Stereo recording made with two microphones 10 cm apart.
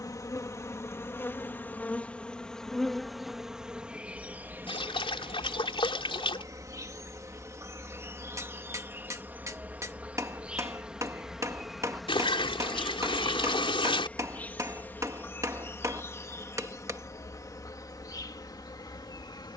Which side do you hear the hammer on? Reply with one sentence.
You can hear the hammer on the right.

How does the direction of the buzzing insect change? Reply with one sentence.
In this clip you hear the buzzing insect move from left to right and back again.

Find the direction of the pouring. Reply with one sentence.
You can hear the pouring on the left.